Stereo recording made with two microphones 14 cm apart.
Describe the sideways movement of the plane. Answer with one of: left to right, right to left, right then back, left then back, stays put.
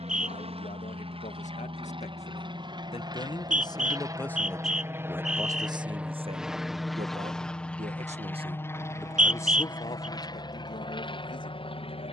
right to left.